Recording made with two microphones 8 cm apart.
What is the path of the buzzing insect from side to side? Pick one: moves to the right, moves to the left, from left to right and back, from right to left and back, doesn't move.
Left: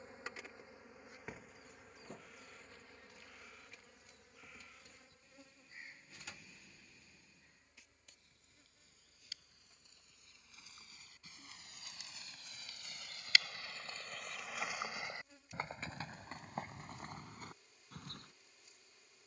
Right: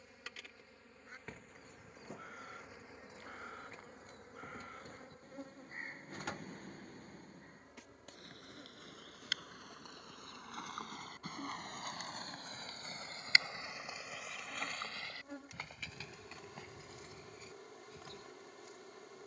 moves to the right.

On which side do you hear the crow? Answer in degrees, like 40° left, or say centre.
50° right.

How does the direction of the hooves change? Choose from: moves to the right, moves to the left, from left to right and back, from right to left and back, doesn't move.
moves to the left.